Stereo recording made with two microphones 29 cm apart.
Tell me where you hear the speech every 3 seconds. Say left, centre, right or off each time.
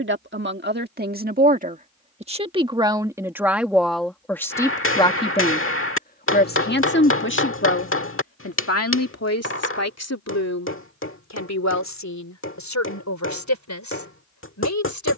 right, centre, left, left, left.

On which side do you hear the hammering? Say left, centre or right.
left.